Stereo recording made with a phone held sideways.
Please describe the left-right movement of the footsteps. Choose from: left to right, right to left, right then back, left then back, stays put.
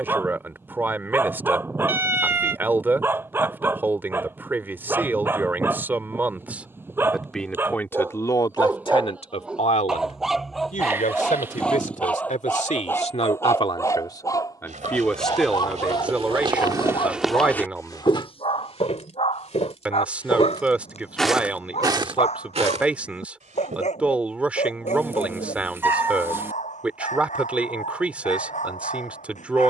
left then back.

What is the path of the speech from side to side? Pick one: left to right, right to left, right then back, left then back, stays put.
left then back.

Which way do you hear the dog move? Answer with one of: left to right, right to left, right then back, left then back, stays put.
right to left.